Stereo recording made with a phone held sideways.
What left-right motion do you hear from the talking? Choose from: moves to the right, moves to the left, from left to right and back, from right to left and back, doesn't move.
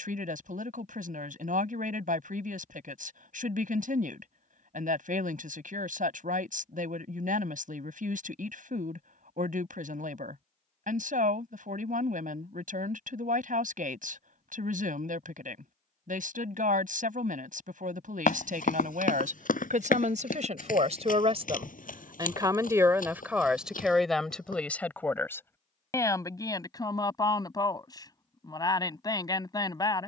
moves to the left.